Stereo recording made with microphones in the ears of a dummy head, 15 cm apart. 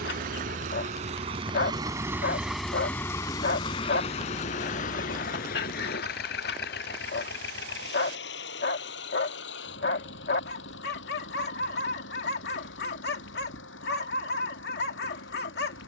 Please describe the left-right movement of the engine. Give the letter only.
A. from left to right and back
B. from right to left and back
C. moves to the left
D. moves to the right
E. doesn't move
C.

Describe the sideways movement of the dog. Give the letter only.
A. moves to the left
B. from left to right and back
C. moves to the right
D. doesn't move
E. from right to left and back
D.